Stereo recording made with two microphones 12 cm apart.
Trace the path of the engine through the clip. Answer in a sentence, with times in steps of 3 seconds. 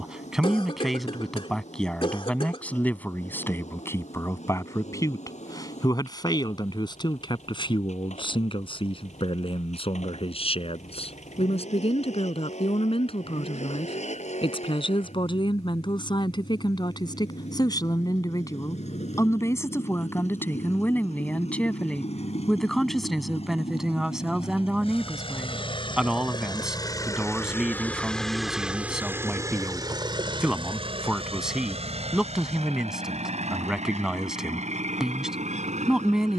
You can hear the engine on the left from 0 s, in the centre from 27 s and on the right from 30 s.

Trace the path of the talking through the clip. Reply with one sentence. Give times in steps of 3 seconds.
In this clip you hear the talking in the centre from 0 s, on the left from 3 s and in the centre from 21 s.